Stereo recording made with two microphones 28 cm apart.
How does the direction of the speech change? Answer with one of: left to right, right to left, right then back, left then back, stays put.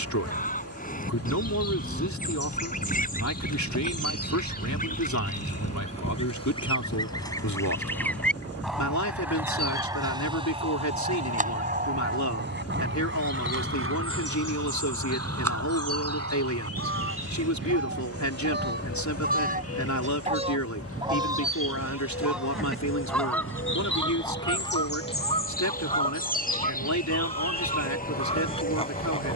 stays put.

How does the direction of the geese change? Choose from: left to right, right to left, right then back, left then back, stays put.
right then back.